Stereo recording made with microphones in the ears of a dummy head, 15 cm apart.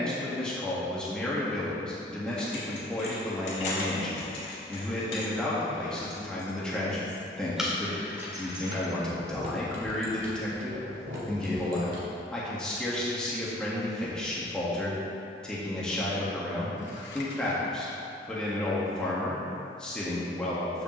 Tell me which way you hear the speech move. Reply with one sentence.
You can hear the speech stay put.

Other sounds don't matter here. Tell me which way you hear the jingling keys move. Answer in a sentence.
In this clip you hear the jingling keys travel towards the right.